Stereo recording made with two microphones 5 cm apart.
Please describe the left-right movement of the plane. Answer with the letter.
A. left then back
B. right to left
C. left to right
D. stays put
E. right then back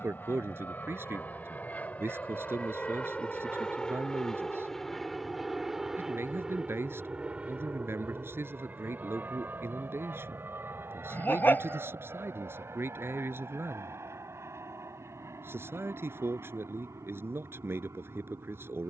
C.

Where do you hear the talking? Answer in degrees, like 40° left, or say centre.
60° right.